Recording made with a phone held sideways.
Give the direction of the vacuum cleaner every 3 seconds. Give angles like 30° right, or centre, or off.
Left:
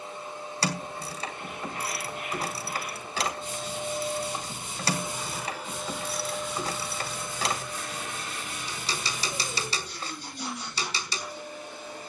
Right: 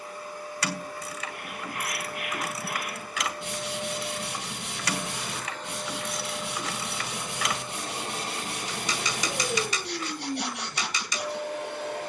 20° left, 20° left, 20° right, 70° right.